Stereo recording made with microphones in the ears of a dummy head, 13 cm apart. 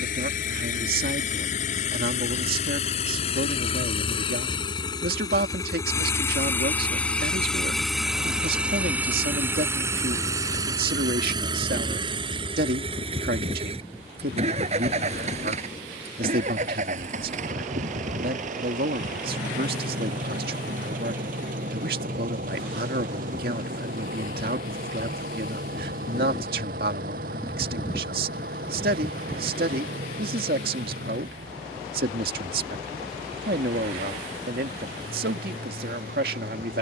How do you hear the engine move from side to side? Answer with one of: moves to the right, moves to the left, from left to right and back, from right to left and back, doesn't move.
moves to the right.